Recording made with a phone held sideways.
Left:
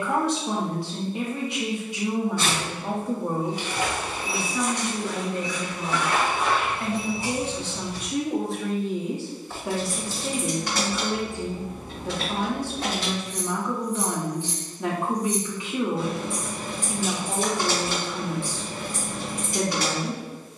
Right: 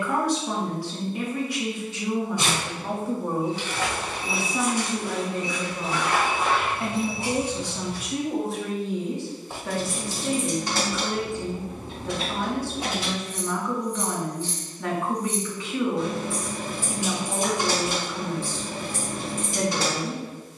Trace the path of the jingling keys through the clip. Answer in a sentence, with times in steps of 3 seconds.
You can hear the jingling keys not at all from 0 s, on the right from 9 s, in the centre from 12 s and on the right from 18 s.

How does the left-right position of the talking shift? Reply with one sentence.
You can hear the talking go right and come back.